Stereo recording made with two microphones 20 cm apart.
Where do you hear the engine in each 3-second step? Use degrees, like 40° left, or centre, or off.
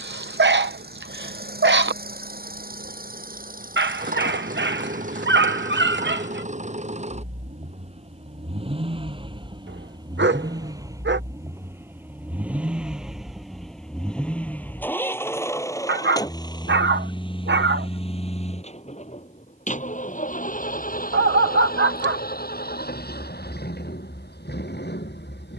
50° right, 40° right, 30° right, 20° right, centre, 20° left, 40° left, 50° left, 60° left.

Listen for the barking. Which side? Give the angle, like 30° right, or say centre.
70° right.